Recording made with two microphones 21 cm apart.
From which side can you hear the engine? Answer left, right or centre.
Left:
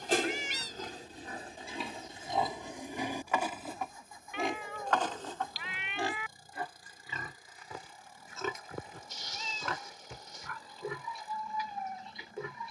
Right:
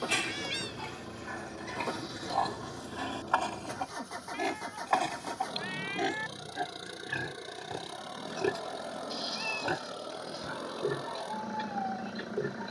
right.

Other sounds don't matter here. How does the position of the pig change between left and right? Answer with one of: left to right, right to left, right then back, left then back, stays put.
left to right.